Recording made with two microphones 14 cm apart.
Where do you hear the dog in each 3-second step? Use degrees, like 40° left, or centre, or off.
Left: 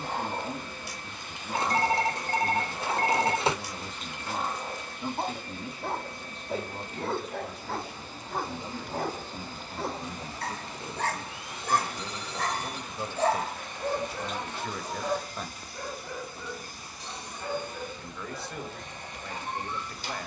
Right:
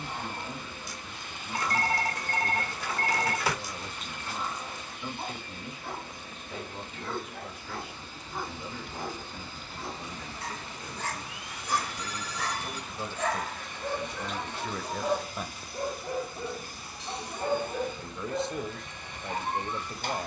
70° left, 70° left, 70° left, 60° left, 20° left, 30° right, 50° right.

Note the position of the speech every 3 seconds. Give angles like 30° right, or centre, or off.
40° left, 40° left, 40° left, 30° left, 10° left, 10° right, 20° right.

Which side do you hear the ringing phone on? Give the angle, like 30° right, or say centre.
30° left.